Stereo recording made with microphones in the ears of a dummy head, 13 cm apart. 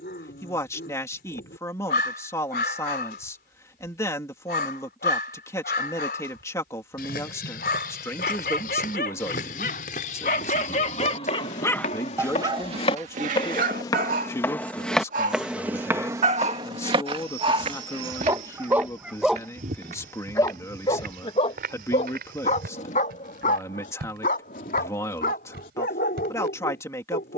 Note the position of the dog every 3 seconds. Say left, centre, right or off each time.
left, left, left, left, right, right, centre, left, left.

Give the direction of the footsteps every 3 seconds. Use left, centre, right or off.
off, off, left, left, left, right, right, right, right.